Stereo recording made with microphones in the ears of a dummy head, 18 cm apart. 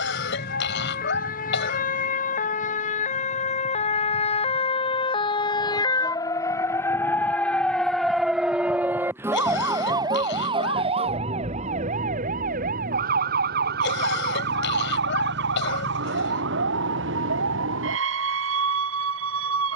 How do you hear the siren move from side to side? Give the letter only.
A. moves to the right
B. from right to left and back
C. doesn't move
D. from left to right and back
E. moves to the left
A.